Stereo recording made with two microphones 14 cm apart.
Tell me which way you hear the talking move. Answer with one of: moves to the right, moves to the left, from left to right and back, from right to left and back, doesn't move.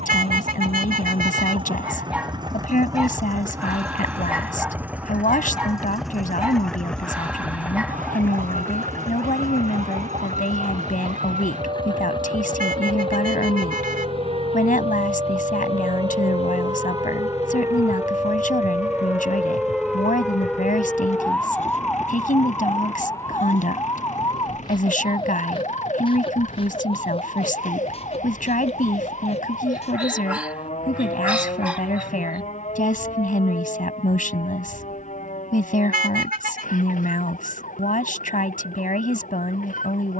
doesn't move.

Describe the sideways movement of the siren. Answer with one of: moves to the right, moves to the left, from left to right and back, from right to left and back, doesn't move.
moves to the left.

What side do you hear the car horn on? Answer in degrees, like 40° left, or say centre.
80° right.